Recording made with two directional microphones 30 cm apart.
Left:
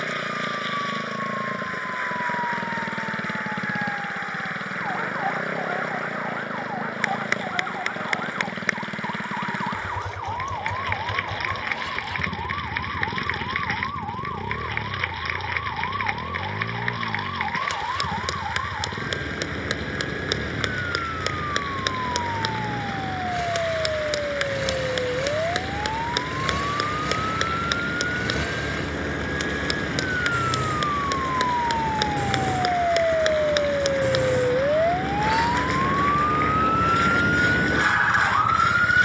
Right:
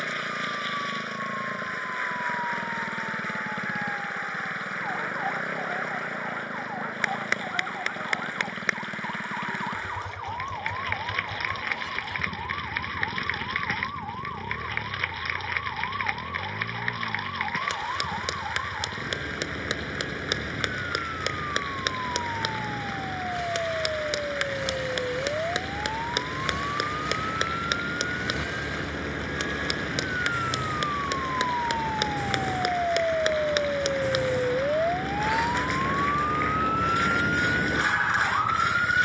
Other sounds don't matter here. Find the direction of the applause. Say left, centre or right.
centre.